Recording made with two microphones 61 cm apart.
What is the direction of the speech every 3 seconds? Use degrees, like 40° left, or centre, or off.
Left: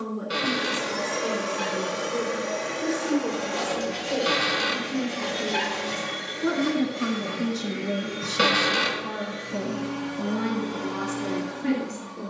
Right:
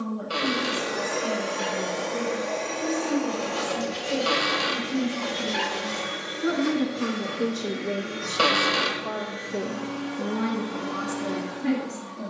20° right, 20° right, 30° left, 10° left.